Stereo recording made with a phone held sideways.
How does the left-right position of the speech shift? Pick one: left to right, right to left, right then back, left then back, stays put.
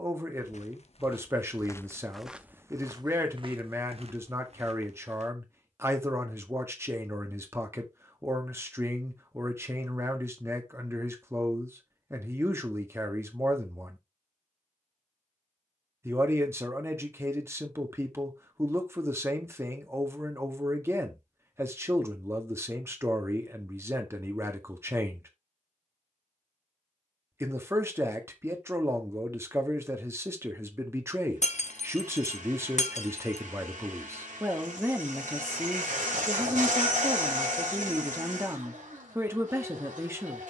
stays put.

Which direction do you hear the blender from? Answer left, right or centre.
right.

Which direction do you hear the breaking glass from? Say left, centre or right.
left.